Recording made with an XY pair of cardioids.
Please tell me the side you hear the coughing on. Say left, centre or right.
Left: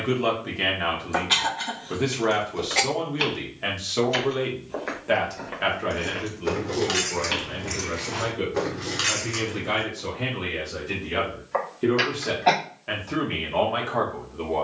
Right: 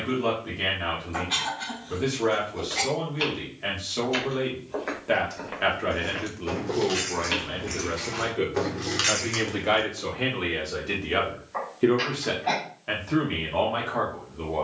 left.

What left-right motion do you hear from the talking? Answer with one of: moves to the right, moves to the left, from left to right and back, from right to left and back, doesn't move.
from left to right and back.